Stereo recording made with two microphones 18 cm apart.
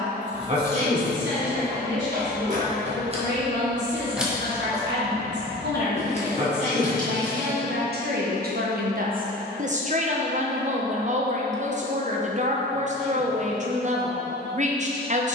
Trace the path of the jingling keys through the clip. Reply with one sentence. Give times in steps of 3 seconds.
In this clip you hear the jingling keys on the right from 0 s, in the centre from 3 s, on the left from 6 s and not at all from 9 s.